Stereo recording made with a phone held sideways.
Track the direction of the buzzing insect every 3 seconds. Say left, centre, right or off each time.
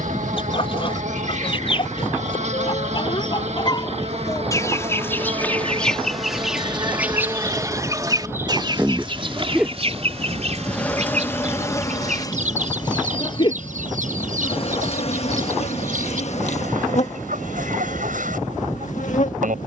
right, right, right, centre, left, left, left.